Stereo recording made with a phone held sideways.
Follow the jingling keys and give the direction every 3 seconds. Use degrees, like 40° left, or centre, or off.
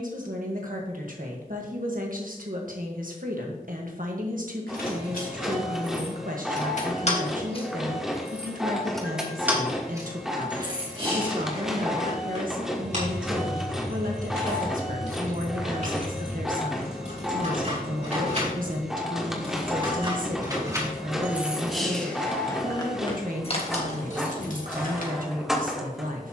off, 70° left, 30° left, 20° right, 50° right, 50° right, 30° right, 20° left, 60° left.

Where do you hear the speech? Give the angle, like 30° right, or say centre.
60° right.